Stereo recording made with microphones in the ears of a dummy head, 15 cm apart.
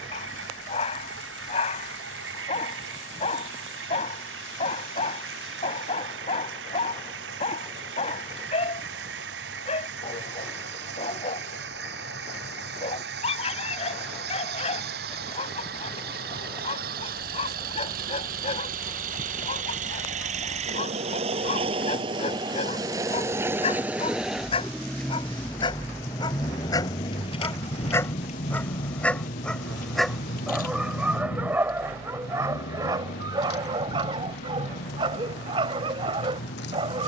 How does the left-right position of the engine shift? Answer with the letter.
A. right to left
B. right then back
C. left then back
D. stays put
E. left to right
A.